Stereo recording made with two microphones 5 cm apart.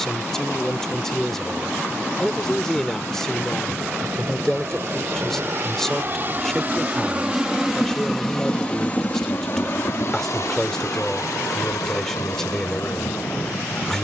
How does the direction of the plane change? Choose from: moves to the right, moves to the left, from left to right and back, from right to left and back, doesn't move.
moves to the left.